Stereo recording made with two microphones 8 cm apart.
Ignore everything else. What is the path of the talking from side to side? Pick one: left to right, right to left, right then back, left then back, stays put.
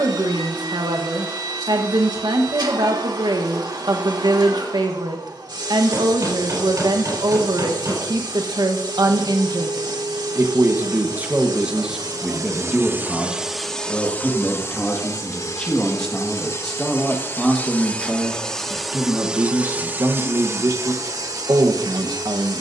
left then back.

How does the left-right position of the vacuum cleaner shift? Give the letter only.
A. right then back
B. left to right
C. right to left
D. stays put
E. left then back
E.